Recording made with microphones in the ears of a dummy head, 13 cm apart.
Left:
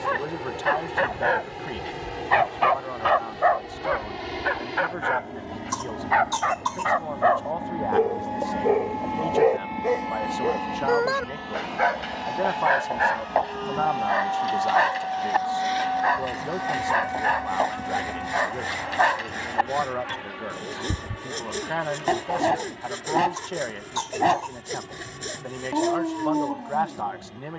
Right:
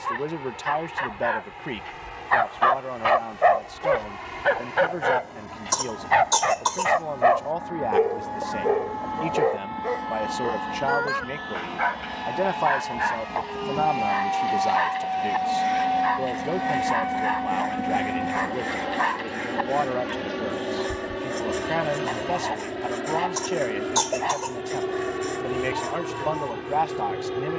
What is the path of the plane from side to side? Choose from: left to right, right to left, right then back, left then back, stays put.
left to right.